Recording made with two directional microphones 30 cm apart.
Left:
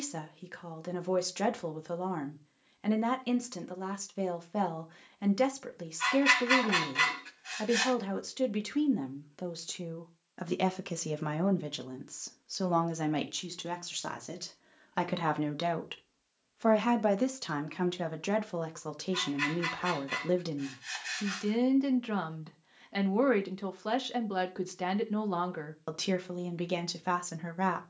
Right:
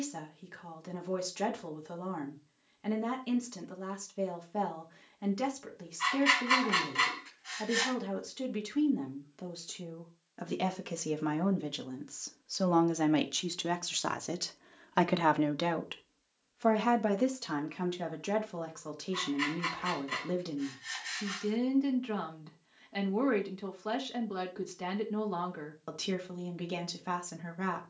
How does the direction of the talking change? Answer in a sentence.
In this clip you hear the talking move from left to right and back again.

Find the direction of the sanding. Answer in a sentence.
In this clip you hear the sanding in the centre.